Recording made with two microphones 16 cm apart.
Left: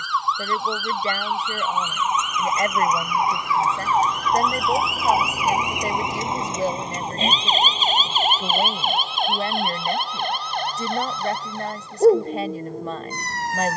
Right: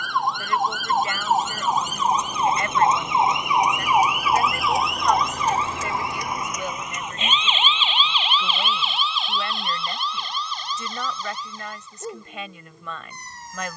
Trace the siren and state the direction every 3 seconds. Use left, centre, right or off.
right, centre, left, left, left.